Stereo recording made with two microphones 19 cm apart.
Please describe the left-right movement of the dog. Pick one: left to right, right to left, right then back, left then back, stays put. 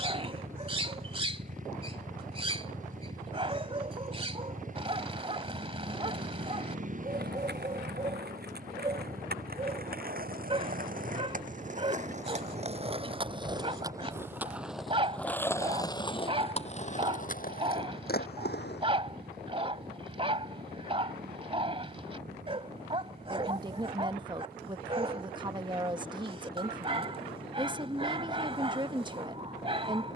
stays put.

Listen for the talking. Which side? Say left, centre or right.
right.